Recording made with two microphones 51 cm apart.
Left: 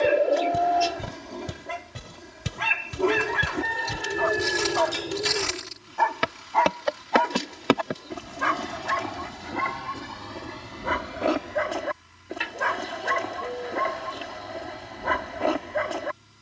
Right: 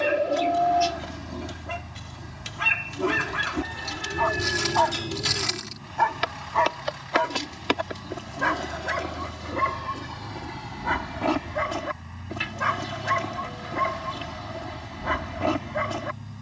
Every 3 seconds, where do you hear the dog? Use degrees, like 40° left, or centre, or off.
30° right, 20° right, 20° left, 10° right, 30° right, 30° right.